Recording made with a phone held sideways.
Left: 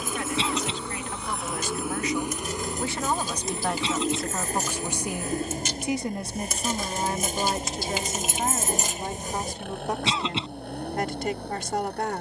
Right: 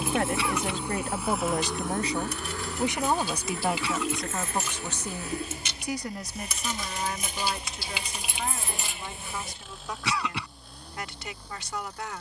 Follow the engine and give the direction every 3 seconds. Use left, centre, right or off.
centre, left, left, left.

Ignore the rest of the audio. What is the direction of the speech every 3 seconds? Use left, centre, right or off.
right, centre, left, left.